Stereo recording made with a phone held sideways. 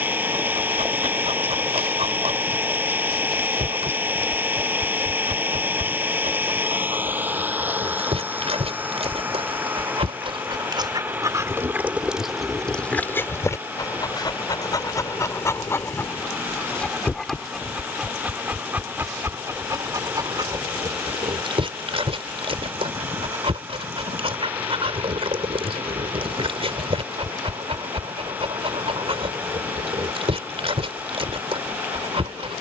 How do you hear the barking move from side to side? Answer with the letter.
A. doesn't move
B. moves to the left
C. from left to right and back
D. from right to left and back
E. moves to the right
D.